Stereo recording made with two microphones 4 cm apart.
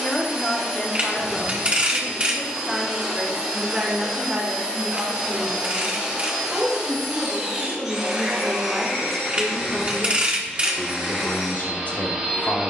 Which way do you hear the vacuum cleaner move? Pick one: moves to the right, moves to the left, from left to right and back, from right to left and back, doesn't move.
doesn't move.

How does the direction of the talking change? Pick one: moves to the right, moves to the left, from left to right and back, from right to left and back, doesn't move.
from left to right and back.